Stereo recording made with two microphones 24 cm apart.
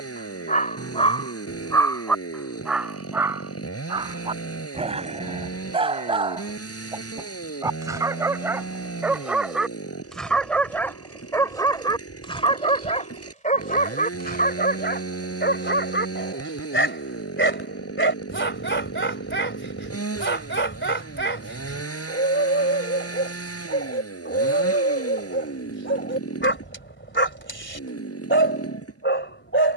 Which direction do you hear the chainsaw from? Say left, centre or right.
left.